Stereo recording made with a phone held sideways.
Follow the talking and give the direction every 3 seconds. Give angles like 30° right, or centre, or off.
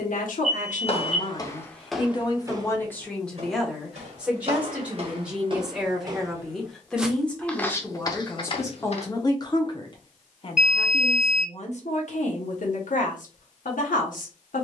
50° left, centre, 10° left, 40° left, 70° left.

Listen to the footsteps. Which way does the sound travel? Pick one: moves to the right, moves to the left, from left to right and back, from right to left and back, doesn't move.
from left to right and back.